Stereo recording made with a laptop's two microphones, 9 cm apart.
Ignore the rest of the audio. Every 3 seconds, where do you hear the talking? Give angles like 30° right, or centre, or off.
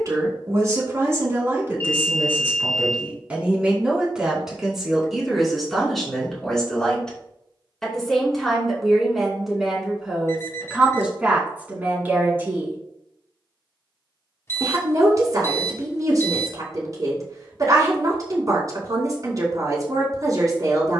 30° right, 10° right, centre, 10° right, 30° right, 40° right, 40° right.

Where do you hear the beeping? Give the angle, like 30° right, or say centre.
30° left.